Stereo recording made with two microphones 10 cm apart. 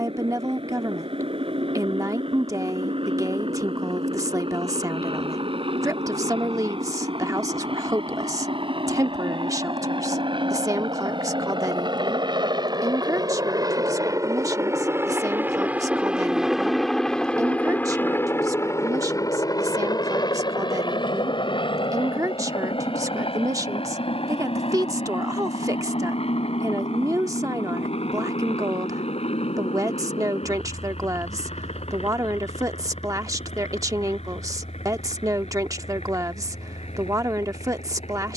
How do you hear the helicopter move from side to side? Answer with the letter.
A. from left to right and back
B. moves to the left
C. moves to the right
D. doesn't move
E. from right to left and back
B.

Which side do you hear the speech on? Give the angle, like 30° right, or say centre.
30° right.